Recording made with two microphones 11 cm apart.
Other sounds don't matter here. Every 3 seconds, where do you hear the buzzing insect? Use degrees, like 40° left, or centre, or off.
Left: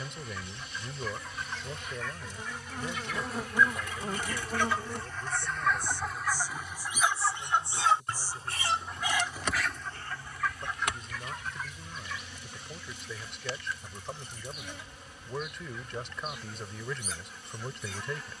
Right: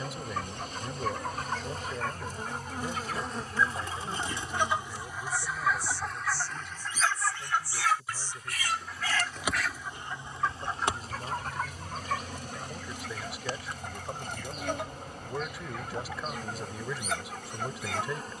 40° right, 30° left, 20° left, 20° right, 40° right, 40° right.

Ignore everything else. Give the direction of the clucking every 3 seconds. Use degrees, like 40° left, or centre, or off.
60° right, 20° right, 20° left, 30° right, 70° right, 70° right.